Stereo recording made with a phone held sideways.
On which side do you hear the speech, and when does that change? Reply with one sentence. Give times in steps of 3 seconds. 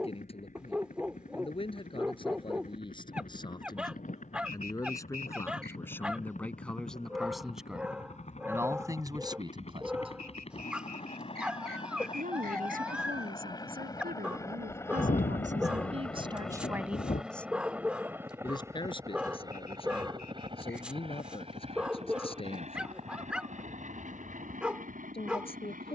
You can hear the speech on the left from 0 s, in the centre from 6 s, on the right from 9 s and on the left from 18 s.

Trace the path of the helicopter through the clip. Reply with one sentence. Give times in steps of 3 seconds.
You can hear the helicopter on the left from 0 s, in the centre from 15 s and on the right from 18 s.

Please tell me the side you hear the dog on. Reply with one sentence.
You can hear the dog in the centre.